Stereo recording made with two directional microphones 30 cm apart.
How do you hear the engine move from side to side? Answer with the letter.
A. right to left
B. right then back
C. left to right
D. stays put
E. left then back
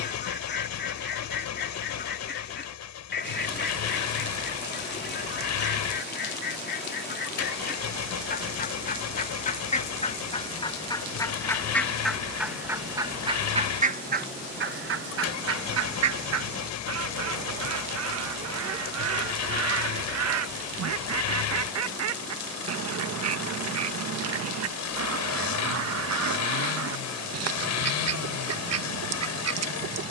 D.